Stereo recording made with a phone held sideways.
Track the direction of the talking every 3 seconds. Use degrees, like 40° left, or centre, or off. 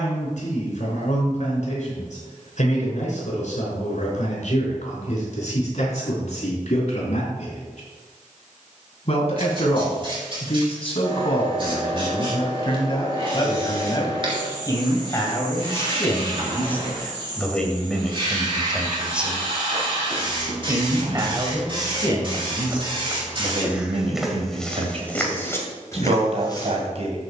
60° left, 60° left, 50° left, 40° left, 30° left, 20° left, 10° right, 40° right, 50° right.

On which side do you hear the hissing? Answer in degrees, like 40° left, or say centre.
40° right.